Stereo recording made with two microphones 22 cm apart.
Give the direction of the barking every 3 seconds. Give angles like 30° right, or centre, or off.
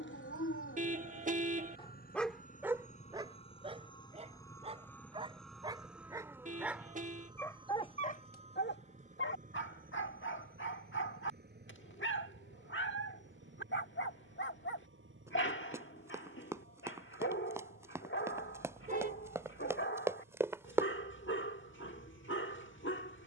40° left, 20° right, 10° left, 60° left, 60° left, 60° left, 60° left, 60° left.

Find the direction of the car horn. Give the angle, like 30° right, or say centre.
30° right.